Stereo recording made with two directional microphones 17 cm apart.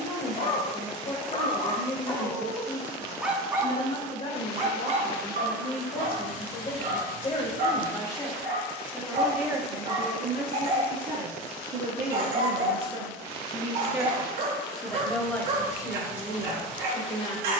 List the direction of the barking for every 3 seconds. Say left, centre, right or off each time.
left, right, right, right, right, right.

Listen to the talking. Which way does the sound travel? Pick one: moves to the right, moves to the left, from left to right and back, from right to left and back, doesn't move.
from left to right and back.